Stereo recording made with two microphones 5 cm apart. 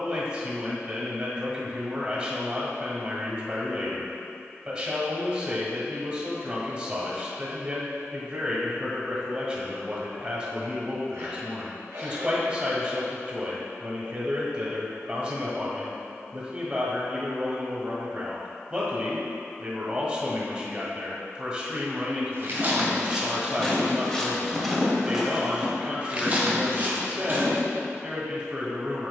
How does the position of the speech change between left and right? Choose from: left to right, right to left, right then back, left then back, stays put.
stays put.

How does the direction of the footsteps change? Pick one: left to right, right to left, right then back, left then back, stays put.
left then back.